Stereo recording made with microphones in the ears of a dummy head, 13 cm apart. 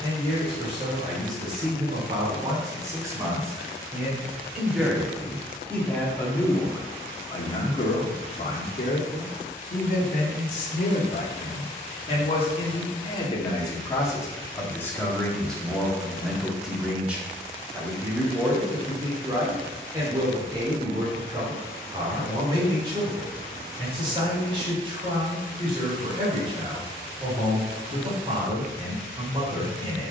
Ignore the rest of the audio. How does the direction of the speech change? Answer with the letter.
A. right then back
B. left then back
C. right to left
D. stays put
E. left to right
B.